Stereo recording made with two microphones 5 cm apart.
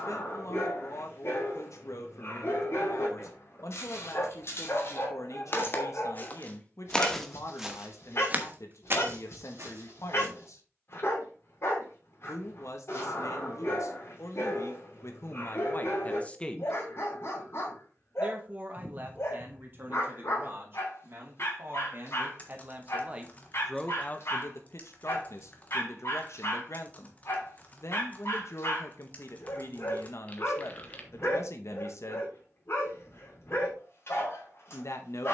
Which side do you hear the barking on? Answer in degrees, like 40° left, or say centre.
60° left.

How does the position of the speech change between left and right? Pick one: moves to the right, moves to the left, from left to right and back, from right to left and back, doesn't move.
from left to right and back.